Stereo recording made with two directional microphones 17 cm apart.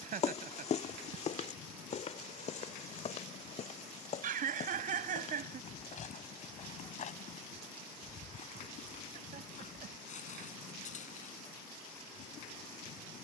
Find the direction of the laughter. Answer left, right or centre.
right.